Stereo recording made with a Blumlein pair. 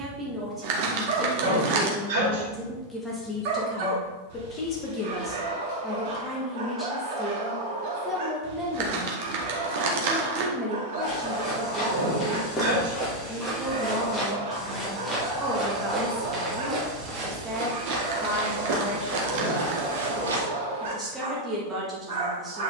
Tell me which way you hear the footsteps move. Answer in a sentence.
You can hear the footsteps go from the left side to the right.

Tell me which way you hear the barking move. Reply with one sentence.
In this clip you hear the barking stay put.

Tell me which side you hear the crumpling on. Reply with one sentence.
In this clip you hear the crumpling on the right.